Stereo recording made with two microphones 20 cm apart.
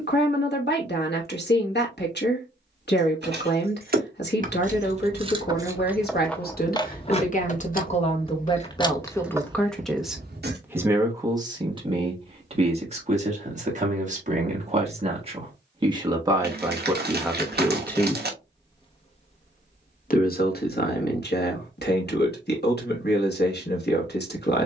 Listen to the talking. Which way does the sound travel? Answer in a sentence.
You can hear the talking move from left to right and back again.